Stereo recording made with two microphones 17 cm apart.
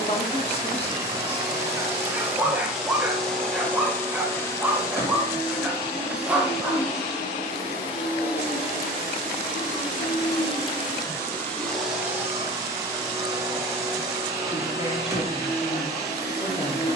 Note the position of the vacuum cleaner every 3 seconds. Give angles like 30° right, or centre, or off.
10° right, 20° left, 40° left, 30° left, 20° right, 20° right.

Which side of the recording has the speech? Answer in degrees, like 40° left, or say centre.
40° left.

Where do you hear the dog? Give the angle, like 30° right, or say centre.
10° right.